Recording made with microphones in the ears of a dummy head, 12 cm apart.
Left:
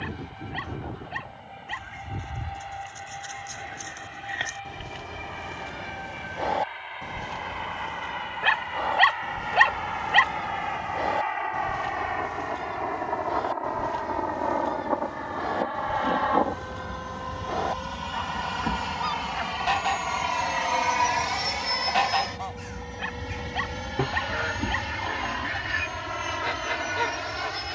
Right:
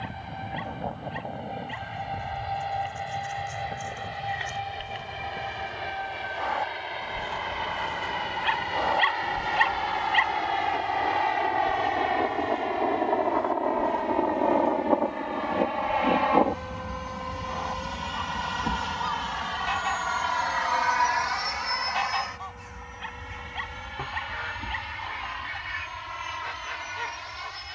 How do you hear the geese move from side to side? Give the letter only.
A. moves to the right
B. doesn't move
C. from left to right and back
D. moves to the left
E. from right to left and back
C.